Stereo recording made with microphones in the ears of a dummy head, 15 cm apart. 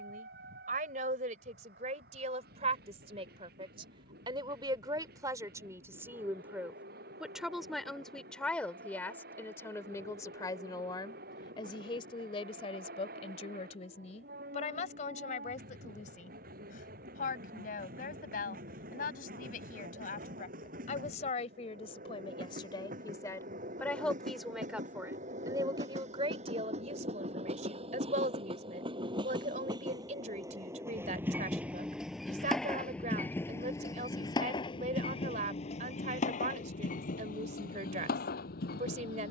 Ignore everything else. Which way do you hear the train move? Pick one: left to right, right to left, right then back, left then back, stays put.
right to left.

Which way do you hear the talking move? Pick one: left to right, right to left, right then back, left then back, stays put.
left then back.